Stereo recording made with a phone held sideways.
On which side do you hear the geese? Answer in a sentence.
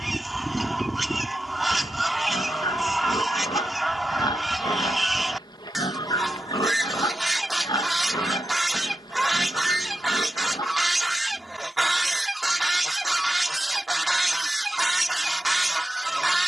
You can hear the geese in the centre.